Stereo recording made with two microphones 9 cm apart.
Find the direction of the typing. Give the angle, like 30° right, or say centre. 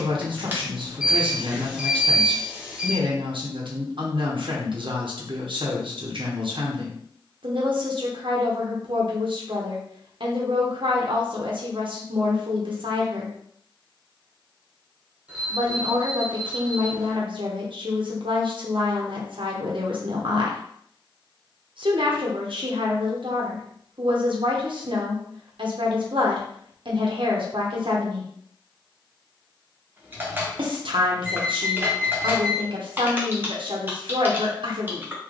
20° right.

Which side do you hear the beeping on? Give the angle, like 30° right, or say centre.
10° right.